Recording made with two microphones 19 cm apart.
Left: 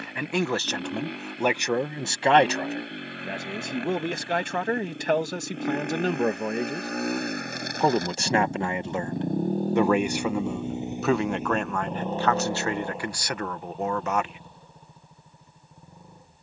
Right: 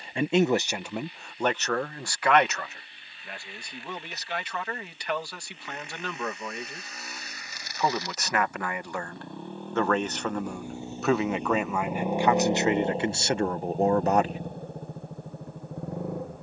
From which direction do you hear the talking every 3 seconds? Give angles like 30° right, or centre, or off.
10° left, 50° left, 30° left, 10° left, 30° right, off.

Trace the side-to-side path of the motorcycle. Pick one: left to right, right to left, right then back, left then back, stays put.
left to right.